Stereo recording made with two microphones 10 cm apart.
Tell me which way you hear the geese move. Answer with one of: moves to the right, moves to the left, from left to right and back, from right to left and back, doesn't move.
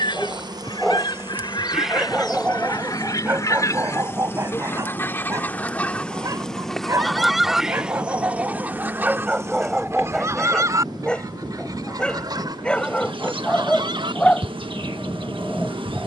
moves to the right.